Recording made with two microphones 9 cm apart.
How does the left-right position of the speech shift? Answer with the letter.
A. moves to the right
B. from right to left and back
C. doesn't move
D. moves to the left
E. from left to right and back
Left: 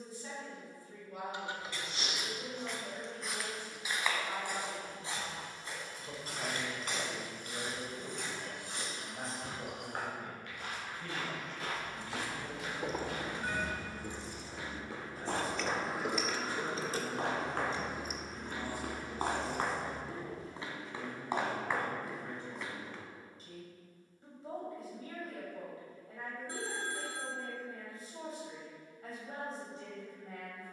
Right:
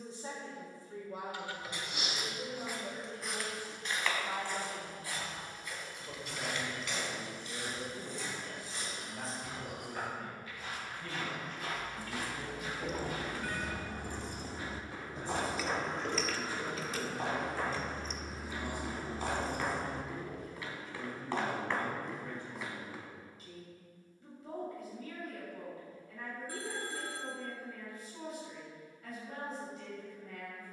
D.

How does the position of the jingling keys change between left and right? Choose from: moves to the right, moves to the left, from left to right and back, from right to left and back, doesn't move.
from right to left and back.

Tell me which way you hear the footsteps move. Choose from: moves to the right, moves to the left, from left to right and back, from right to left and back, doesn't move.
from right to left and back.